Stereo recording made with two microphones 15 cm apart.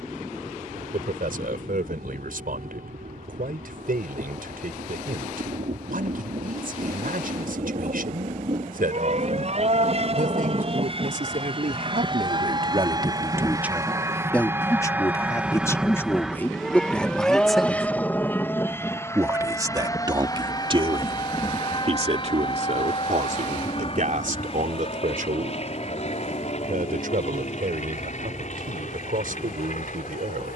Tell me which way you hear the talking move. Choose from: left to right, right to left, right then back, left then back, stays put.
left then back.